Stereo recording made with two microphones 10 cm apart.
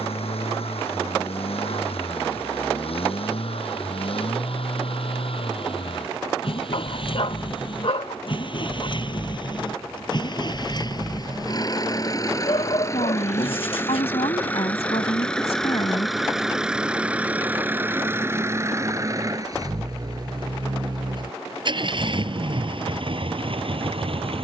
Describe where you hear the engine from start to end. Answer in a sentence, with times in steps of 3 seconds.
You can hear the engine on the left from 0 s, in the centre from 15 s and on the right from 18 s.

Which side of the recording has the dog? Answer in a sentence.
You can hear the dog on the left.